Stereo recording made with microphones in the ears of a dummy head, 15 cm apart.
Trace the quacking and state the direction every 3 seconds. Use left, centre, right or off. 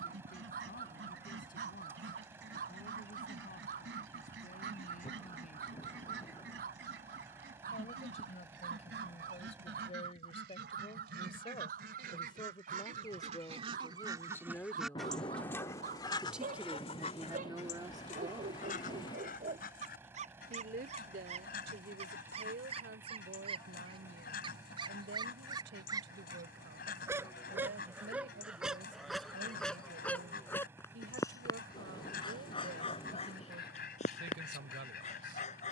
right, right, right, right, right, left, left, left, left, left, left, left.